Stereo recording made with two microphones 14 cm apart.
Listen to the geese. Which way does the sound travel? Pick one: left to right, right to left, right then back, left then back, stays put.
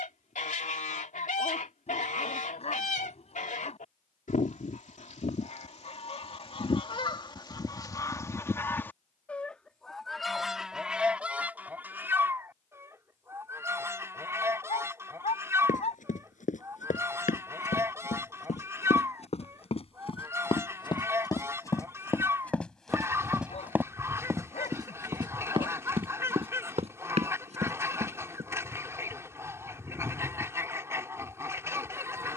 left to right.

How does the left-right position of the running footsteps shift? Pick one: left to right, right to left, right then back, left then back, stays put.
left to right.